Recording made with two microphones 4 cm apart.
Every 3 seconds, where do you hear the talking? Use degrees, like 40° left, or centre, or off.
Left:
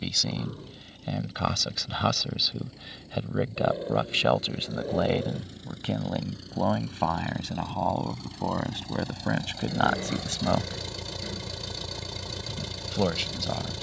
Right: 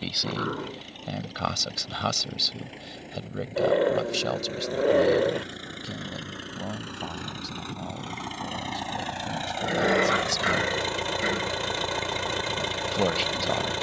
centre, 30° left, 60° left, 50° left, 10° right.